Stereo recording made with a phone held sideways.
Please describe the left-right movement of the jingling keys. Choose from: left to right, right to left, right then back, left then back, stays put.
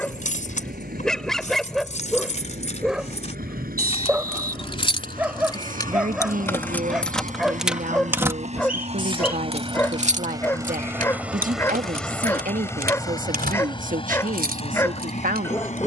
left to right.